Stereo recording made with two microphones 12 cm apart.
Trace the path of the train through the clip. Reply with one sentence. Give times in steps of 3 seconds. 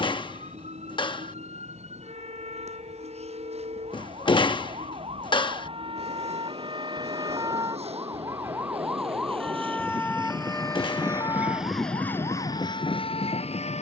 In this clip you hear the train on the right from 0 s and on the left from 12 s.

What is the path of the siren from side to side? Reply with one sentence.
In this clip you hear the siren move to the left.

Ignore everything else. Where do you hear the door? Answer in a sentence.
You can hear the door on the left.